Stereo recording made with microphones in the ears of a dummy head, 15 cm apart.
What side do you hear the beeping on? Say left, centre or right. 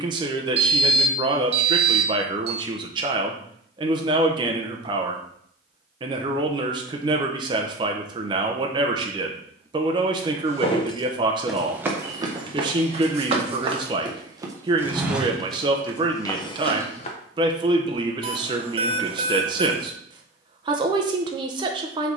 right.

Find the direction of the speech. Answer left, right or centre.
right.